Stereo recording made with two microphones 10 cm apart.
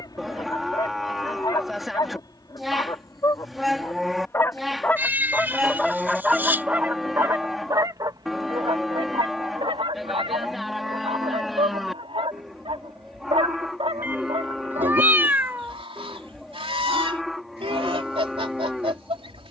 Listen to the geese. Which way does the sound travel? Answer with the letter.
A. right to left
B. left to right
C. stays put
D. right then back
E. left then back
B.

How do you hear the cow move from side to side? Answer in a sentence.
You can hear the cow stay put.